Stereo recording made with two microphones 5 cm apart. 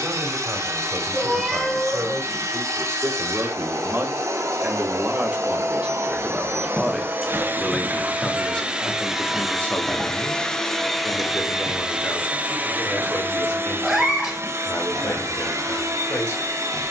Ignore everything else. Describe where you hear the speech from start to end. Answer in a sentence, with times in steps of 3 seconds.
You can hear the speech on the right from 0 s, in the centre from 6 s and on the left from 9 s.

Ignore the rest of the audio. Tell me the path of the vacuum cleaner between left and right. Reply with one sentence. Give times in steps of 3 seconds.
You can hear the vacuum cleaner on the right from 0 s, in the centre from 9 s and on the right from 12 s.